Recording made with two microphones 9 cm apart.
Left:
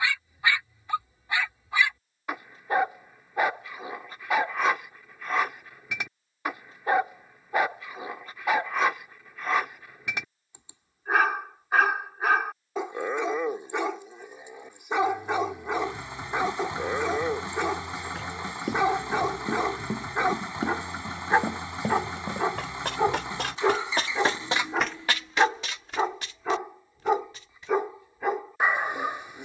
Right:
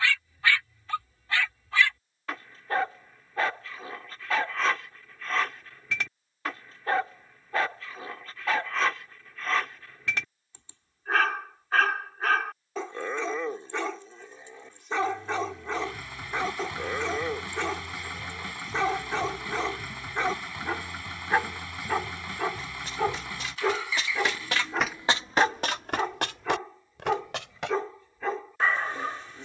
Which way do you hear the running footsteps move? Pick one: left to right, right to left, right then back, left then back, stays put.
left to right.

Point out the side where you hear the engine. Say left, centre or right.
left.